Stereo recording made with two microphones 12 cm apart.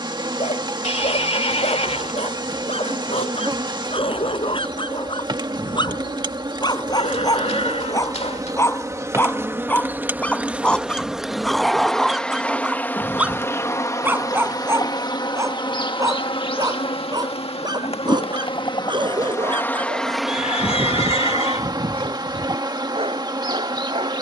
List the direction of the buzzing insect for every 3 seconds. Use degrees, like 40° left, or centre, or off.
40° right, 40° right, 30° right, 10° right, 20° left, 50° left, 20° left, 30° right.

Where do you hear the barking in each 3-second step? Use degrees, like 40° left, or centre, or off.
60° left, 50° left, 30° left, 10° left, 10° right, 30° right, 40° right, 50° right.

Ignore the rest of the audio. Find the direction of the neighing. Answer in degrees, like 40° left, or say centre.
60° left.